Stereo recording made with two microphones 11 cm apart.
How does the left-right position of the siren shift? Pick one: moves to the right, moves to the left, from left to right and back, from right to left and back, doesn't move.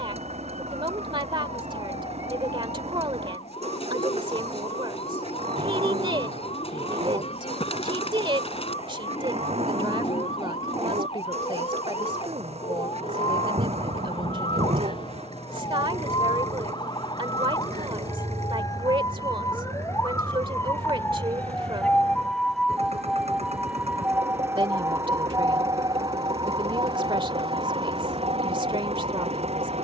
moves to the right.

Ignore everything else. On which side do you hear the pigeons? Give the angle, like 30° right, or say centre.
60° left.